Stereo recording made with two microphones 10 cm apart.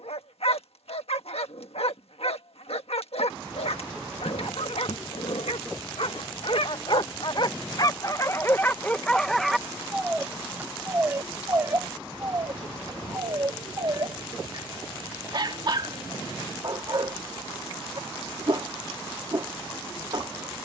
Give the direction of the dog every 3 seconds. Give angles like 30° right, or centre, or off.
80° left, 80° left, 40° left, 10° right, 40° right, 50° right, 50° right.